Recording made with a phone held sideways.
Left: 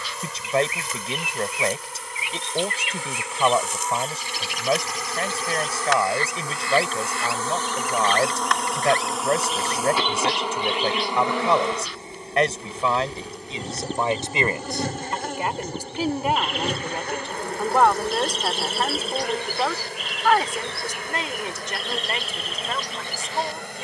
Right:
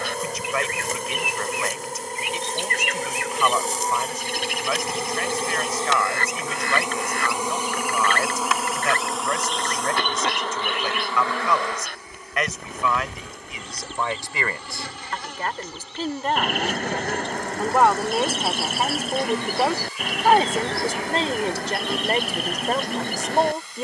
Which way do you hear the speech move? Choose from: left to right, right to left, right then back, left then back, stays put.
left to right.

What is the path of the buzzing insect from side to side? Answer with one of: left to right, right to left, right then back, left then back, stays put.
right to left.